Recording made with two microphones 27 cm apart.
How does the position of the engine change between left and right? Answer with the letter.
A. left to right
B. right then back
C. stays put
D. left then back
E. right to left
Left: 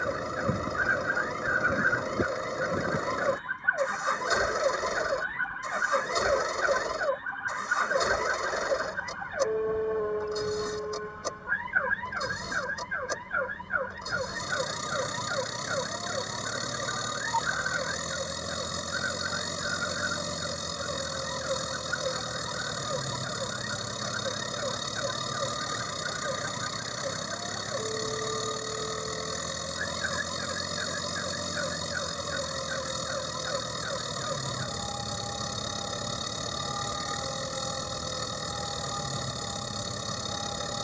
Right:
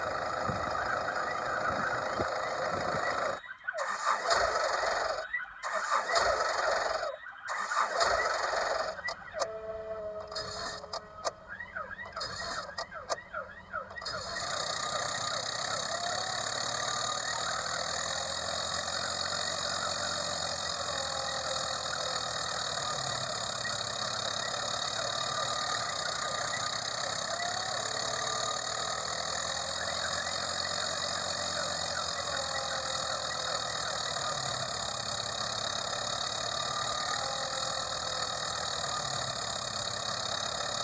C.